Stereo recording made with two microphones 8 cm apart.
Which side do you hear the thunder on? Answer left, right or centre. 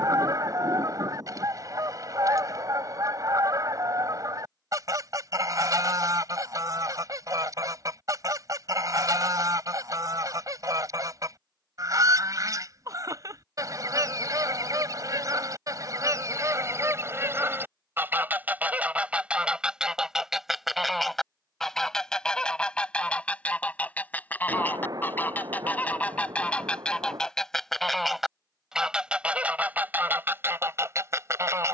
right.